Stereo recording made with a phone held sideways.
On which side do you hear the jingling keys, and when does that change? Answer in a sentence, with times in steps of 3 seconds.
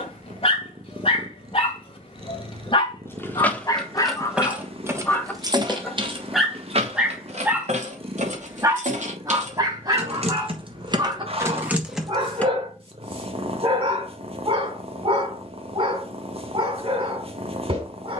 In this clip you hear the jingling keys not at all from 0 s, in the centre from 3 s, on the right from 6 s, in the centre from 12 s and not at all from 15 s.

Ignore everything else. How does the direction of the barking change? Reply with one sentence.
You can hear the barking go from the left side to the right.